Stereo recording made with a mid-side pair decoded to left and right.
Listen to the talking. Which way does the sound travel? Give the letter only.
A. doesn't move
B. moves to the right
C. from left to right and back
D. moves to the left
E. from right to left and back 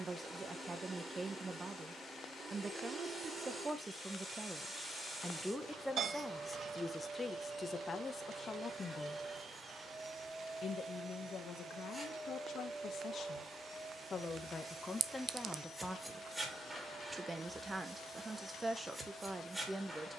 E.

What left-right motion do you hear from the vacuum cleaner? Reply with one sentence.
You can hear the vacuum cleaner stay in one place.